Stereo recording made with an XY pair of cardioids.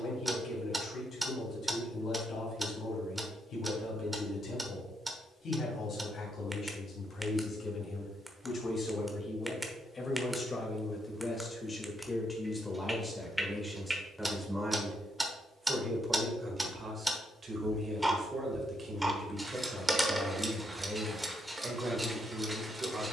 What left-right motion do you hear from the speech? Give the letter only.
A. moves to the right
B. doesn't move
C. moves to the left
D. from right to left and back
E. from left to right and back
A.